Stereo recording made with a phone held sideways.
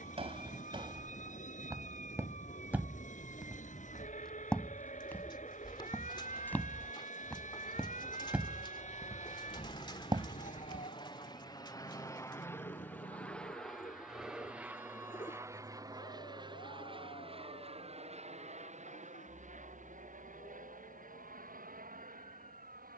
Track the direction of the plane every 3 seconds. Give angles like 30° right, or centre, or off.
70° left, 60° left, 50° left, 40° left, 10° left, 30° right, 50° right, 60° right.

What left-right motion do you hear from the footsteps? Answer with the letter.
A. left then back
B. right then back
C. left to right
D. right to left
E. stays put
A.